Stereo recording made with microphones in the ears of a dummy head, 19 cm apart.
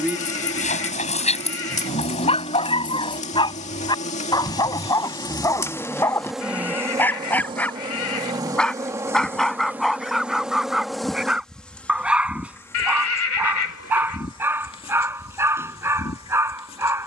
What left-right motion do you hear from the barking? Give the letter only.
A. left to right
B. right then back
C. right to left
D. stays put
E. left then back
A.